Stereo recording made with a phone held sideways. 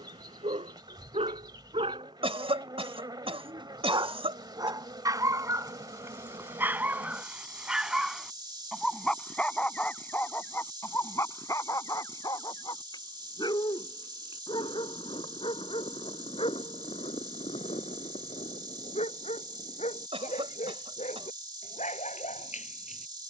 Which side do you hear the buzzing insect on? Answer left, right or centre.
right.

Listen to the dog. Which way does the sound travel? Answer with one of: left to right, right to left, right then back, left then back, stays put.
right to left.